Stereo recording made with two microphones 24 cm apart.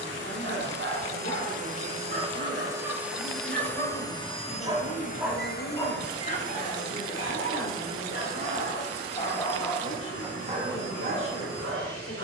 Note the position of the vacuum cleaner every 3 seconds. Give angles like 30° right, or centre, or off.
30° right, 20° left, 60° left, 70° left.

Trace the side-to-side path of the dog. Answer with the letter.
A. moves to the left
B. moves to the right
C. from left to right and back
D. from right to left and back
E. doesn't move
D.